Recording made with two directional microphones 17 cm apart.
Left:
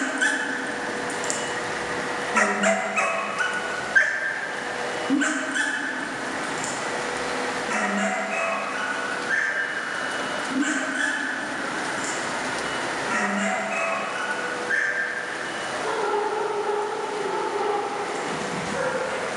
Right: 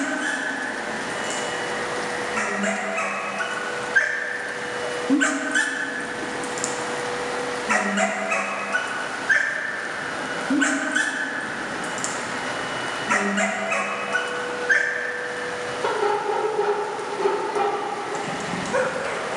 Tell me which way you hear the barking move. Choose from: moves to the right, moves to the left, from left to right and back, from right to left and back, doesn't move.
moves to the right.